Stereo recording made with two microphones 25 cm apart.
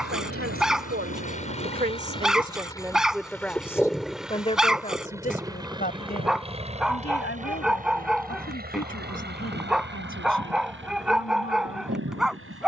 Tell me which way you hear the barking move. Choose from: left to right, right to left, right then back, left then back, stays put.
stays put.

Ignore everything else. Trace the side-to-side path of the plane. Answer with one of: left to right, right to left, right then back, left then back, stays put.
left to right.